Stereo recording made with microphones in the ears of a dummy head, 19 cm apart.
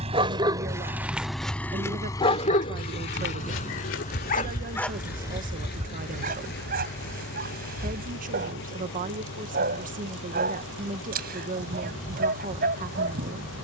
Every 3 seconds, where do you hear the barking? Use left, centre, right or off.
centre, left, right, right, right.